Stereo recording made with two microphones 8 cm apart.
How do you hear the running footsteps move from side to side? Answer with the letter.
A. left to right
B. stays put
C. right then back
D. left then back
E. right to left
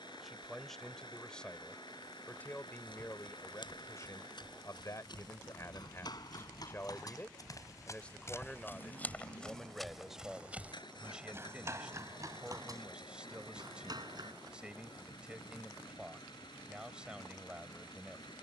A.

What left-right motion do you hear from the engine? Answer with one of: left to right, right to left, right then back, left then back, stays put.
stays put.